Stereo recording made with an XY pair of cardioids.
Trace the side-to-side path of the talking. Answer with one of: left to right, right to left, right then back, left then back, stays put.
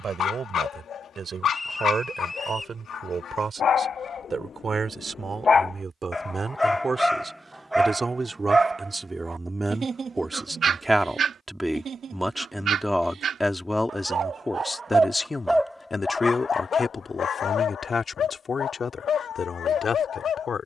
right to left.